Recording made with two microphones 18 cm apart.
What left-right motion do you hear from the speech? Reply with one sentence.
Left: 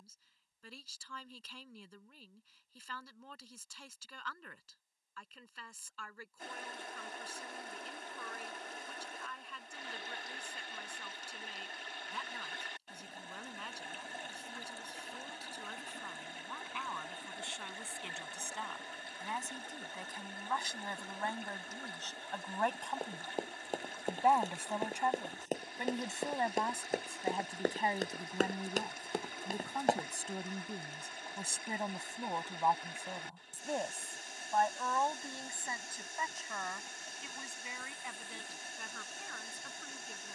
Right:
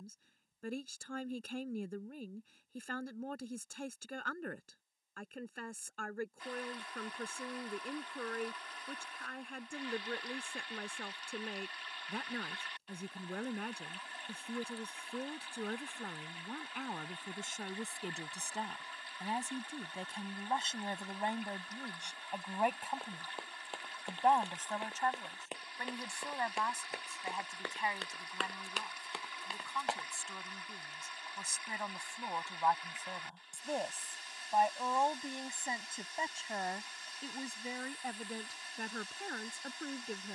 In this clip you hear the speech move from right to left and back again.